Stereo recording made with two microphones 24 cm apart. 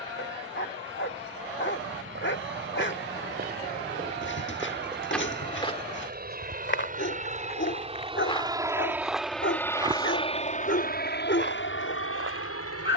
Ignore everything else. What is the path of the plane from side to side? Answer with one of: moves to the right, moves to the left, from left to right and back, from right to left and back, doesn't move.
moves to the left.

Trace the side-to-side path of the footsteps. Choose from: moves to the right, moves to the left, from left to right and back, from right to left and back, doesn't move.
from right to left and back.